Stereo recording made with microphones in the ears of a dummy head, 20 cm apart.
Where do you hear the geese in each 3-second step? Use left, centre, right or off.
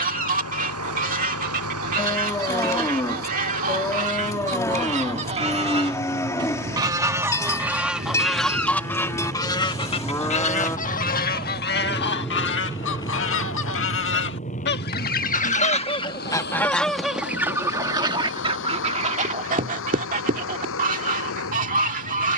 right, right, centre, left, left, centre, right, right.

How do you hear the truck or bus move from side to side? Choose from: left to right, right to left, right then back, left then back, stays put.
right to left.